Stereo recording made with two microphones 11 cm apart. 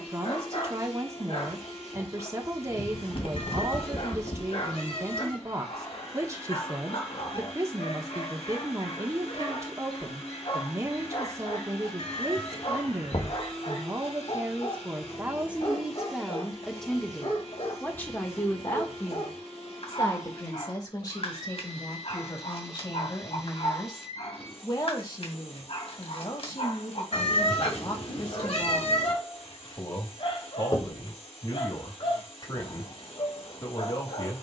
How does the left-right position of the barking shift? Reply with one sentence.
In this clip you hear the barking stay in one place.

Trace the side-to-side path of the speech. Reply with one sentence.
In this clip you hear the speech move from right to left.